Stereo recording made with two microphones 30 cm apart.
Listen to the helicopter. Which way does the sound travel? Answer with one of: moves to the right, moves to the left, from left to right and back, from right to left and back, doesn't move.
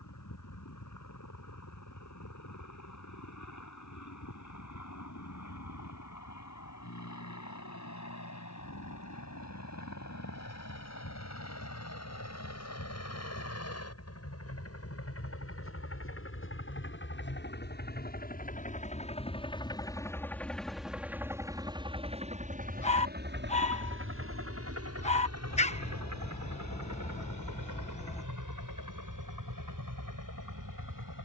moves to the right.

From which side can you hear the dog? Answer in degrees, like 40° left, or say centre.
20° left.